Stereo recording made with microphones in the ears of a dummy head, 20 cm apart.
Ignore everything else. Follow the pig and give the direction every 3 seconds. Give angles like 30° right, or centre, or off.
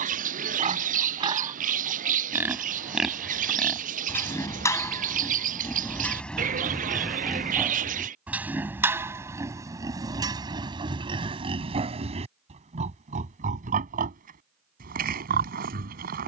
20° right, 10° left, centre, 20° right, 30° right, 40° right.